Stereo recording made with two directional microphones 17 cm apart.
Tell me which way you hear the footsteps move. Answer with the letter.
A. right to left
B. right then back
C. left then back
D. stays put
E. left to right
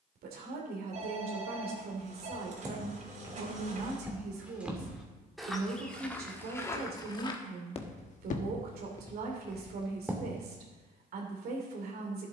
C.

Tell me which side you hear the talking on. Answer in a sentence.
You can hear the talking on the right.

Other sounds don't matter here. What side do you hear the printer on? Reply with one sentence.
You can hear the printer on the right.